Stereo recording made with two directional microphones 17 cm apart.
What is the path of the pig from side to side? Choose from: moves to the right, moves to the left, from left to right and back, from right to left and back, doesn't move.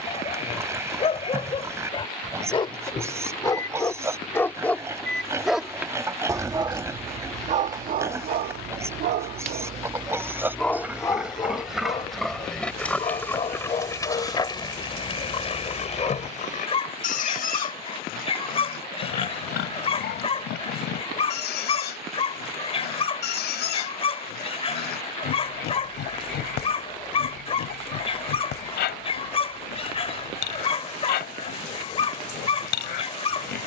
moves to the left.